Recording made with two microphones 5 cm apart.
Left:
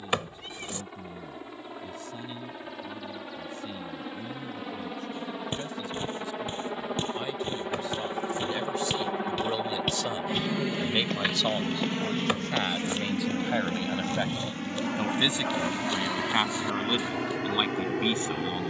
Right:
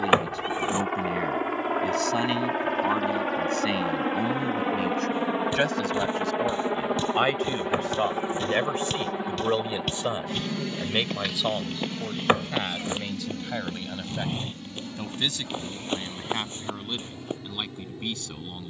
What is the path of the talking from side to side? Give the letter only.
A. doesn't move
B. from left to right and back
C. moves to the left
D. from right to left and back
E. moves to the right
C.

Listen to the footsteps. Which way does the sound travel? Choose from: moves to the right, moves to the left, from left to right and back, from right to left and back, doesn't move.
moves to the right.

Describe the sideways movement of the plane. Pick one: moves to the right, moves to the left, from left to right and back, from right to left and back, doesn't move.
moves to the left.